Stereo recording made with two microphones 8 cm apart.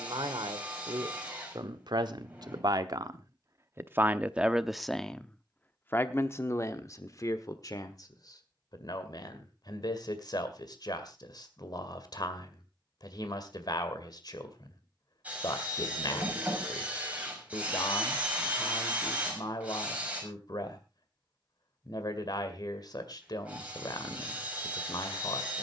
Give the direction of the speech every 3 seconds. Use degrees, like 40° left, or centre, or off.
60° right, 10° right, 40° left, 60° left, 60° left, 60° left, 60° left, 60° left, 60° left.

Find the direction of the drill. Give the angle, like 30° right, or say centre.
20° right.